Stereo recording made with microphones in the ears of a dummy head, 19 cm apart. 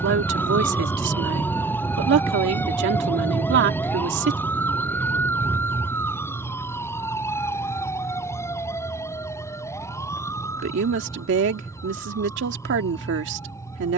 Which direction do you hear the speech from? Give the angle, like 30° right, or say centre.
60° right.